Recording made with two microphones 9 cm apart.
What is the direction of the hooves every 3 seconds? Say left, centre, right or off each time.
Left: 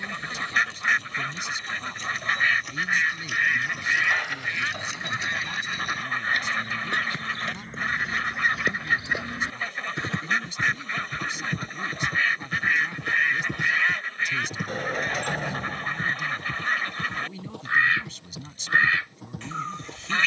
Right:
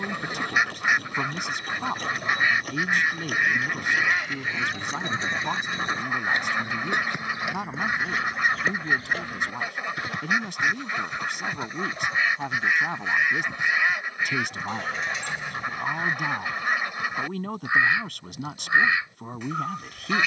right, right, centre, left, left, left, left.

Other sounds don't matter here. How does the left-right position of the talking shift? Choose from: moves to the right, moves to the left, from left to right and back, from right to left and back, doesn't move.
doesn't move.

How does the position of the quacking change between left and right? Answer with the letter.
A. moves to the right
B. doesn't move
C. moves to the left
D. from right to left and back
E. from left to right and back
B.